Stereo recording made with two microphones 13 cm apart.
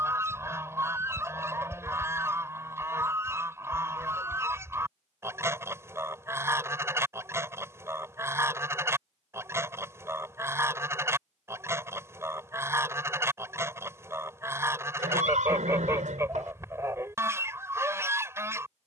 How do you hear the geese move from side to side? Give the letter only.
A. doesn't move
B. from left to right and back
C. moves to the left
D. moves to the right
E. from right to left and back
A.